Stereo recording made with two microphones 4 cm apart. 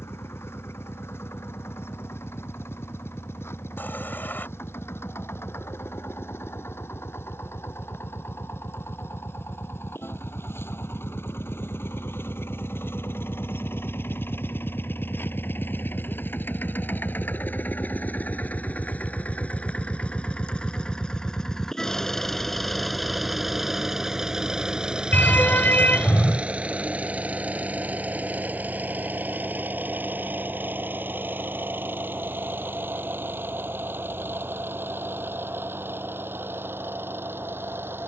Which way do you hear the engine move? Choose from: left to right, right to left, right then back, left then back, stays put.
left to right.